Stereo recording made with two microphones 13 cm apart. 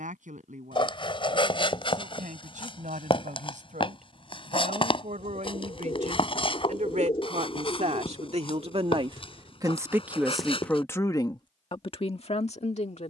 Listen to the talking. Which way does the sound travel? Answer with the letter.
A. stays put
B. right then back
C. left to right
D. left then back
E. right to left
E.